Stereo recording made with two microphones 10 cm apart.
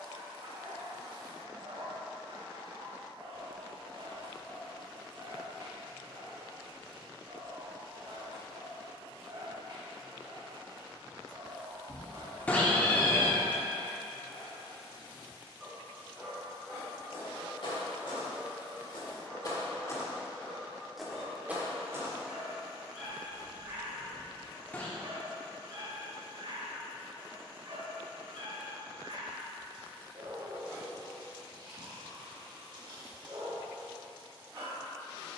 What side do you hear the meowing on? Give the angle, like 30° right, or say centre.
10° left.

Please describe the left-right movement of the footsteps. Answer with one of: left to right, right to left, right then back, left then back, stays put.
left to right.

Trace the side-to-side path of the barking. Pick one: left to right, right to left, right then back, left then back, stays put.
left then back.